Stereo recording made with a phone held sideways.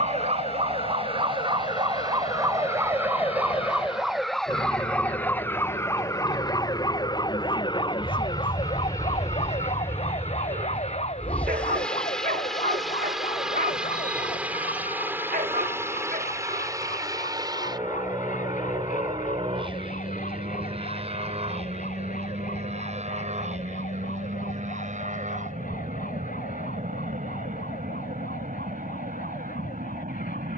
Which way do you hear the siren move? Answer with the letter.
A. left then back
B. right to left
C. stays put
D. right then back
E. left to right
B.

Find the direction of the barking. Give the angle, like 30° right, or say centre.
80° right.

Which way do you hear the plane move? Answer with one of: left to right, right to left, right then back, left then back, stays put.
left to right.